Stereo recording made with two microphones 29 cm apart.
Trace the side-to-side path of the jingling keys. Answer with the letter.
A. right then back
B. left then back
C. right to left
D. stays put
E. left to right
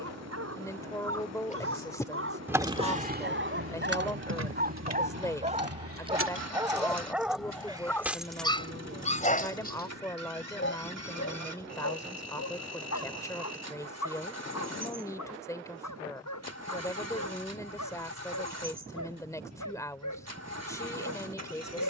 A.